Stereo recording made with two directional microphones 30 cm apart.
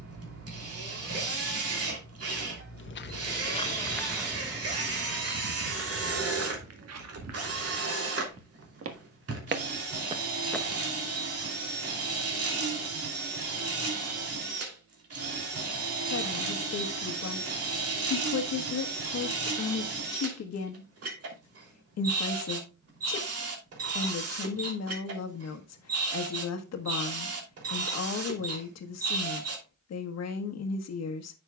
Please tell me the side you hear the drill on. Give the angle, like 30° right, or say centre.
50° right.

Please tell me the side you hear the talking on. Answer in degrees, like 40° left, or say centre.
60° left.